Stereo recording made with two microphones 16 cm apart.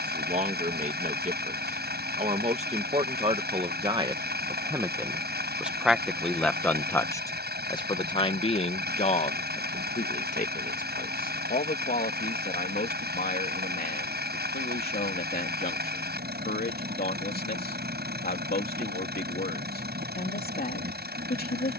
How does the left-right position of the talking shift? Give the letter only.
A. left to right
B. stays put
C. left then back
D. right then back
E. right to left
E.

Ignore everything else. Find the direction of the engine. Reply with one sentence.
You can hear the engine on the right.